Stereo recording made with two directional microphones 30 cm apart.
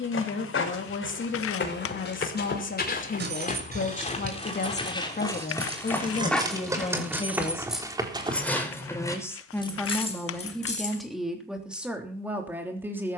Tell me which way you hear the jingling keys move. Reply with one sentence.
You can hear the jingling keys move to the left.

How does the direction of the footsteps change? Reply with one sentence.
In this clip you hear the footsteps travel towards the right.